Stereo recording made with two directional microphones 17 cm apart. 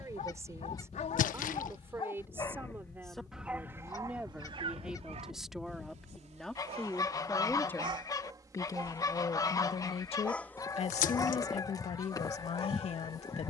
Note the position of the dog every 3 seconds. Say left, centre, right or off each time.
left, right, right, centre, left.